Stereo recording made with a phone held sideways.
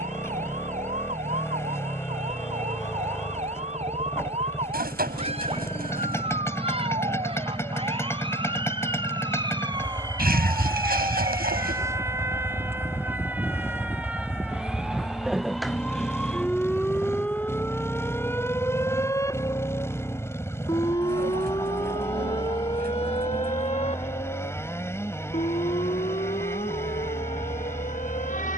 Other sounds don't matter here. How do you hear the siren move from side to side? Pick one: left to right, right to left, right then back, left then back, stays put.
right to left.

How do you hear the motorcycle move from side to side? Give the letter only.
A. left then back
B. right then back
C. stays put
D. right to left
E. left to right
C.